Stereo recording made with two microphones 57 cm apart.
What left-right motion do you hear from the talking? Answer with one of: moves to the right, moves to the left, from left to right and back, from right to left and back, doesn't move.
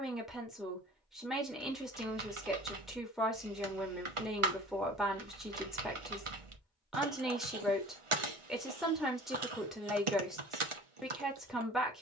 doesn't move.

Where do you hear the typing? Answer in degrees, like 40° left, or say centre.
60° right.